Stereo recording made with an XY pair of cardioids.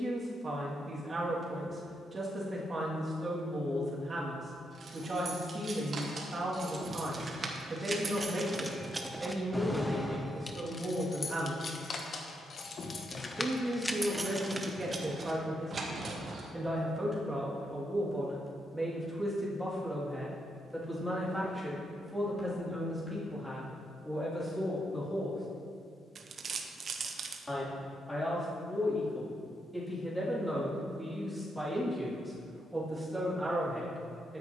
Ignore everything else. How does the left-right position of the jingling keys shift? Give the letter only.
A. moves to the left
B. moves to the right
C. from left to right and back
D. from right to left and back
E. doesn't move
D.